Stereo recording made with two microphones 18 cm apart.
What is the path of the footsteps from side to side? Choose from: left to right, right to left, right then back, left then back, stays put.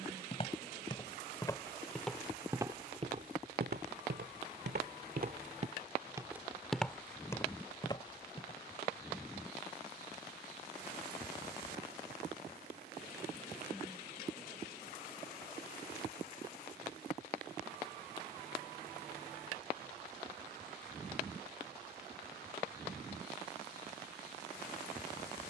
right then back.